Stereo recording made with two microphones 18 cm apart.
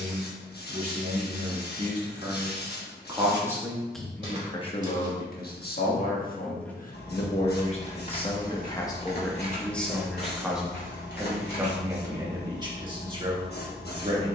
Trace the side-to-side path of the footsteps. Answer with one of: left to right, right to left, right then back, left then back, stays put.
right to left.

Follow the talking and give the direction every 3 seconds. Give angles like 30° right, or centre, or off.
40° right, 20° left, 40° left, centre, 30° right.